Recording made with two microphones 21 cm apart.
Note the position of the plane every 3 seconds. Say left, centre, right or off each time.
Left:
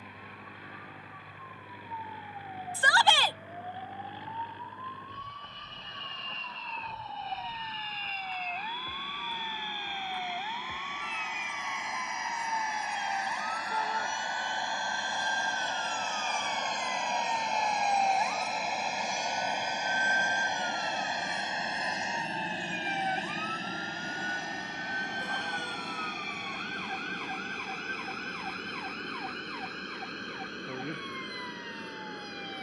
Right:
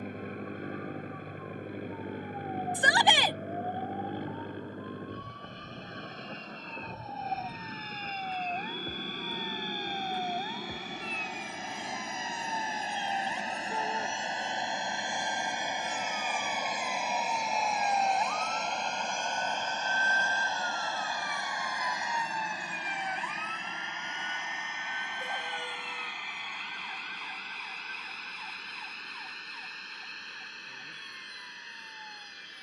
right, right, right, right, right, centre, centre, left, left, left, left.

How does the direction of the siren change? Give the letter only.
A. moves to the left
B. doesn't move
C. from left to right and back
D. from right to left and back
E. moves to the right
A.